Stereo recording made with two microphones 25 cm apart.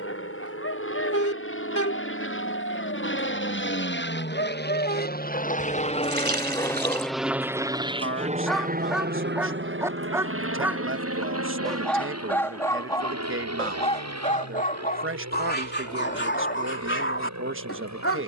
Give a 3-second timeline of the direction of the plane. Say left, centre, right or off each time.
left, left, centre, right, right, right.